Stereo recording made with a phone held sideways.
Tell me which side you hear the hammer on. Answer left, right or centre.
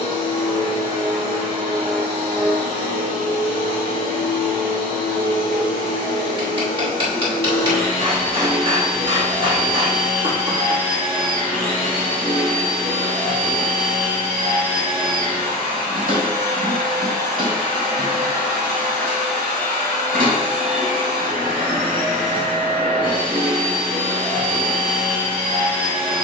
right.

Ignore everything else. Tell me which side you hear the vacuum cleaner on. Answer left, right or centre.
right.